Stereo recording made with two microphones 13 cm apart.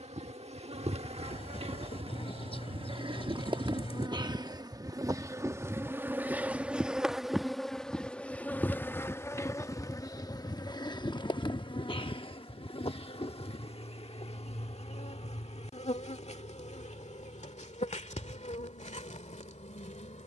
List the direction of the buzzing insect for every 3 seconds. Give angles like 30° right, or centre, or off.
50° right, 30° right, centre, 30° left, 50° left, 60° left, 70° left.